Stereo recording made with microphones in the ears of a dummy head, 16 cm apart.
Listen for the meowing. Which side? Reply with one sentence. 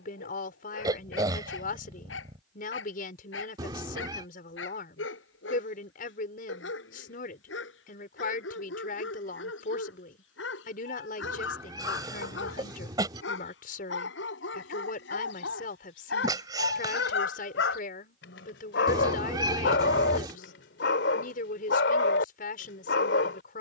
In this clip you hear the meowing on the right.